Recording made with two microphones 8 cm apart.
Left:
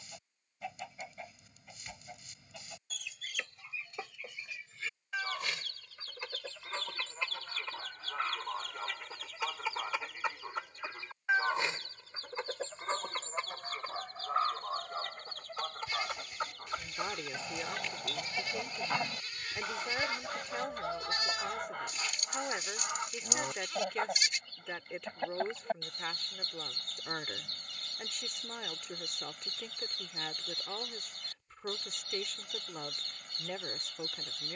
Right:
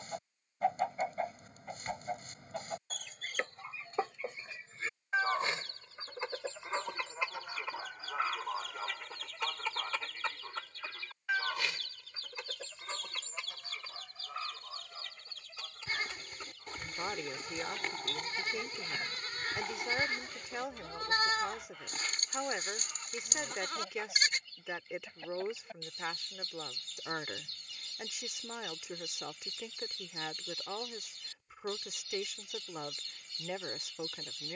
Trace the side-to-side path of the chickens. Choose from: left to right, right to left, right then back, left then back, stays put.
right to left.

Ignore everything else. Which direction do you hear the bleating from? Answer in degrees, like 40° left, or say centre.
50° right.